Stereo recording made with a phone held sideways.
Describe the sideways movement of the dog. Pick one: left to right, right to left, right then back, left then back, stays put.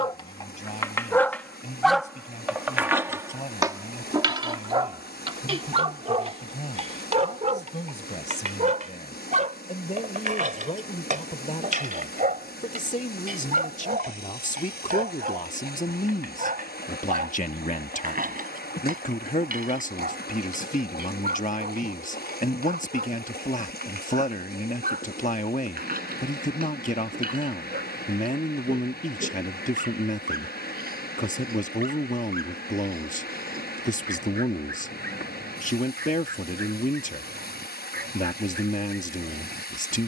left to right.